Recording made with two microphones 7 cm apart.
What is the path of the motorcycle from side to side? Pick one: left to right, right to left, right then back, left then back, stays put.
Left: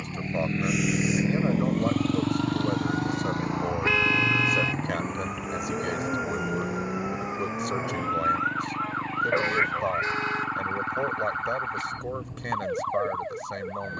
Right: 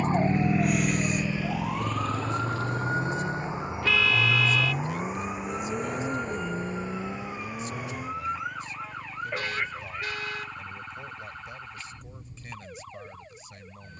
right to left.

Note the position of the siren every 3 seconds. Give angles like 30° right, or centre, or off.
40° right, 10° right, 20° left, 40° left, 50° left.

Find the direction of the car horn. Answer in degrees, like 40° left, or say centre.
30° left.